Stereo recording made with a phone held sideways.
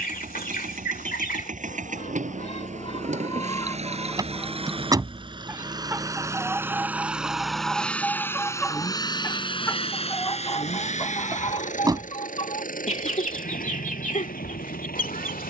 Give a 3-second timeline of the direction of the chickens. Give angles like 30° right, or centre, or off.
60° left, 10° left, centre, 30° left, 50° left.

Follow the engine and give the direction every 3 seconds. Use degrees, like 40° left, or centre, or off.
60° right, 40° right, centre, 40° left, 70° left.